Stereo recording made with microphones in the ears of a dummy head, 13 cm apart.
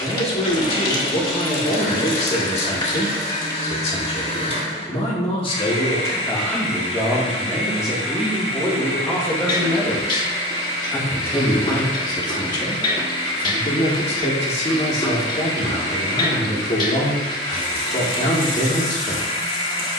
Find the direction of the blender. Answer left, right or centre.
left.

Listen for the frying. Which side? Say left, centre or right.
left.